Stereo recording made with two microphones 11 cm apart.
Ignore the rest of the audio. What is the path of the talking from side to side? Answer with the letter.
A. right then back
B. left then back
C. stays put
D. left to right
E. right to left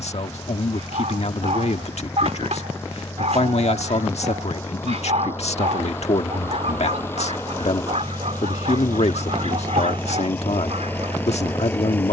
C.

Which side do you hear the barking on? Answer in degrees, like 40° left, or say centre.
80° right.